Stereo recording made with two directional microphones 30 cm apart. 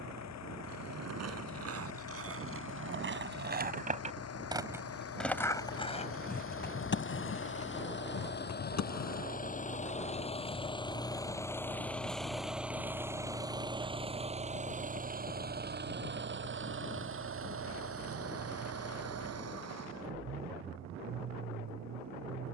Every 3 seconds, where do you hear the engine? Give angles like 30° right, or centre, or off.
60° left, 50° left, 40° left, 20° left, 10° right, 40° right, 50° right, 60° right.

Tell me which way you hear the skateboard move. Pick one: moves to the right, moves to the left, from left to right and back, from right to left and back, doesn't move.
moves to the left.